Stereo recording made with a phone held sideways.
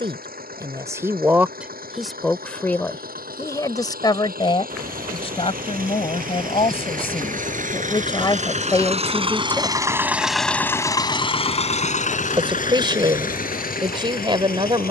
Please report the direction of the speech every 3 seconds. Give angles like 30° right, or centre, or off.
10° right, 30° left, 30° left, 20° left, 30° right.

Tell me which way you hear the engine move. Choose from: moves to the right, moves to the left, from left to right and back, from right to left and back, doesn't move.
moves to the left.